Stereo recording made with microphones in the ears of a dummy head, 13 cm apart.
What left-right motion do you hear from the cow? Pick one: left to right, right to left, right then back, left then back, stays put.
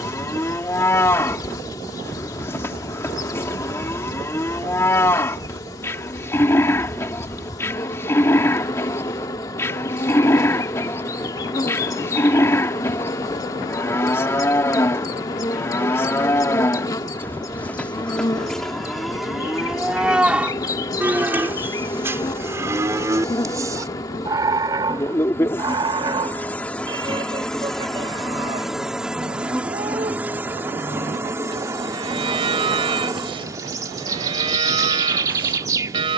left to right.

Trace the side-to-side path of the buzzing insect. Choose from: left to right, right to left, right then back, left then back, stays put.
left to right.